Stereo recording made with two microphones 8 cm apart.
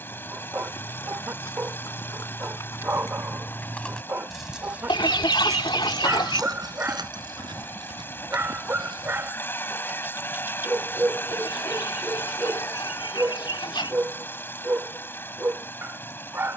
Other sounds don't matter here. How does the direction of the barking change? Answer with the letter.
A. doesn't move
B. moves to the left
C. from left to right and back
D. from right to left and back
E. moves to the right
A.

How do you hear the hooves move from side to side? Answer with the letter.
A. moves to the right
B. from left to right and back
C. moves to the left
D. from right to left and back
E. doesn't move
A.